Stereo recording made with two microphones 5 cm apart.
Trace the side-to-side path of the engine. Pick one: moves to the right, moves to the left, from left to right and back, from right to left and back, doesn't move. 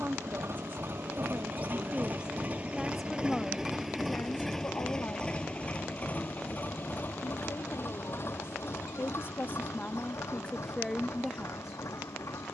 moves to the left.